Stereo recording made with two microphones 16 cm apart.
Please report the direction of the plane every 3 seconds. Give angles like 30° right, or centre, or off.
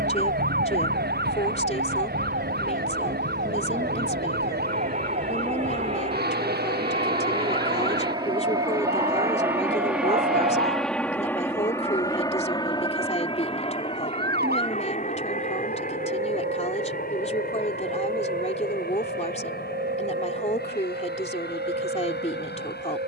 60° right, 50° right, 30° right, centre, 30° left, 50° left, 60° left, 70° left.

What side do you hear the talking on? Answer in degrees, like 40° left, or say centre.
40° left.